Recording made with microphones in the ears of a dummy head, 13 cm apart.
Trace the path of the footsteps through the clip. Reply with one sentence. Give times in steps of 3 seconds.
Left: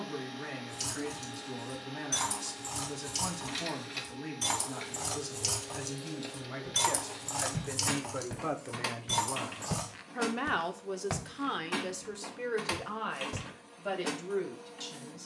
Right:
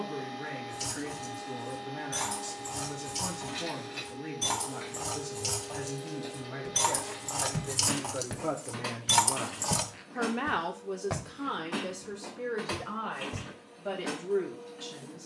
You can hear the footsteps not at all from 0 s, on the right from 6 s and on the left from 9 s.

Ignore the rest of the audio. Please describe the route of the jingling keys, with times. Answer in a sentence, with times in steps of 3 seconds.
You can hear the jingling keys on the left from 0 s, in the centre from 6 s, on the right from 9 s and not at all from 12 s.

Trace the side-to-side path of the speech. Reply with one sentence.
In this clip you hear the speech move from left to right and back again.